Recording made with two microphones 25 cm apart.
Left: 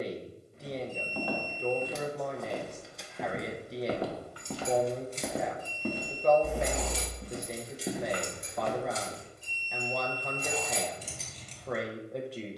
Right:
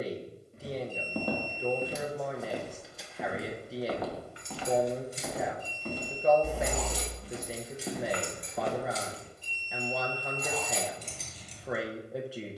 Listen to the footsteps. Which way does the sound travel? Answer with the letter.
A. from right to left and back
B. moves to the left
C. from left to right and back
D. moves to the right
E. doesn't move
A.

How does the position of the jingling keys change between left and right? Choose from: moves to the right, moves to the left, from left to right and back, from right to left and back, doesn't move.
from right to left and back.